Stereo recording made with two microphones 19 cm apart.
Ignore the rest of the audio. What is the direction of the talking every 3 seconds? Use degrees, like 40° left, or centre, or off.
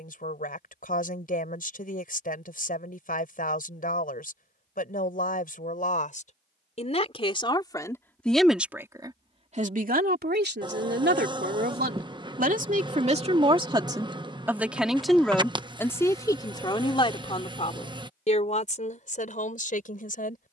50° left, 50° left, 20° left, 50° right, 30° right, 20° left, 40° left.